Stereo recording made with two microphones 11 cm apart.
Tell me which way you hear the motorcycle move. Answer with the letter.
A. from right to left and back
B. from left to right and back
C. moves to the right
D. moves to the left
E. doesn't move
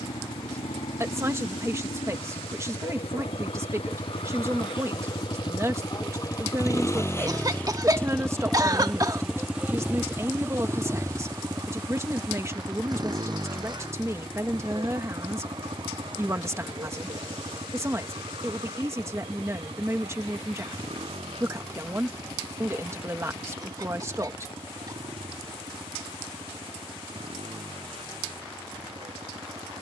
C.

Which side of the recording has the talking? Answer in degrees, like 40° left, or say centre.
30° right.